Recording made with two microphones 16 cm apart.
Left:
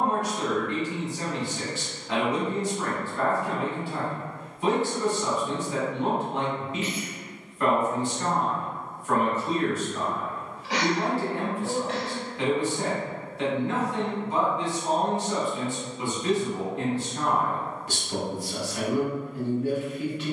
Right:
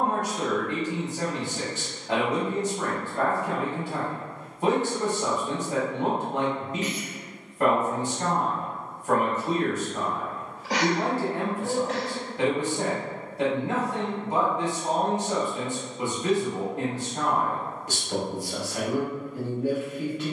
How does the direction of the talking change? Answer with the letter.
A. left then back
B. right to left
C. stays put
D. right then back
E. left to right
C.